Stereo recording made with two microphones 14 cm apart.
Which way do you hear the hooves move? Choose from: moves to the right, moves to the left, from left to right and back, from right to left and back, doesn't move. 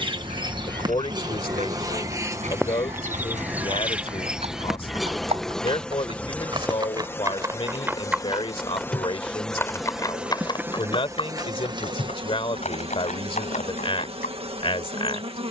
moves to the left.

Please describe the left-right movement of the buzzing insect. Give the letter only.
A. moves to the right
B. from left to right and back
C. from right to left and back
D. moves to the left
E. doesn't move
C.